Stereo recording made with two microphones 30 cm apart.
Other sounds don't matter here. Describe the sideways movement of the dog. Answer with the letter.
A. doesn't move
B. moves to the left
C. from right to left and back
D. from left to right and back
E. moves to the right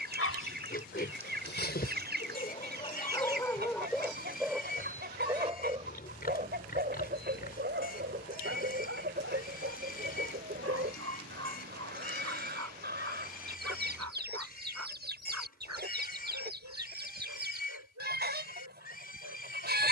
E.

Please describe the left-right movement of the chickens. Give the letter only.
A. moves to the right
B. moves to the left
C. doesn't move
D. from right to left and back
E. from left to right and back
C.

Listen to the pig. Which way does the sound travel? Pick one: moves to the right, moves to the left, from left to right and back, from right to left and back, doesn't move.
doesn't move.